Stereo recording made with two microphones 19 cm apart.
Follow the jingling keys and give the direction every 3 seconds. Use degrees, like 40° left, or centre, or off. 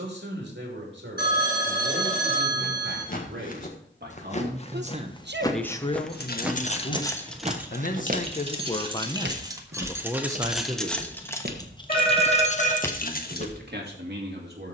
off, off, 10° left, centre, 40° left.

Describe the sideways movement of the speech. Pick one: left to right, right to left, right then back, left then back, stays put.
left then back.